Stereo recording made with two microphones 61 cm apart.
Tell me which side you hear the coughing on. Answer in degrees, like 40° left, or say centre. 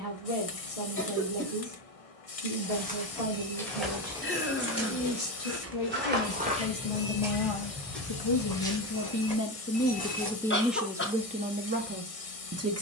20° left.